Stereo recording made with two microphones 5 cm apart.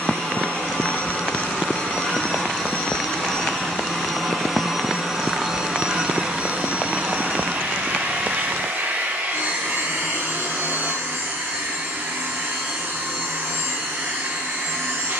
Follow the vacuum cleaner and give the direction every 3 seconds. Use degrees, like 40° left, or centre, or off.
30° left, centre, 50° right, 80° right, 80° right.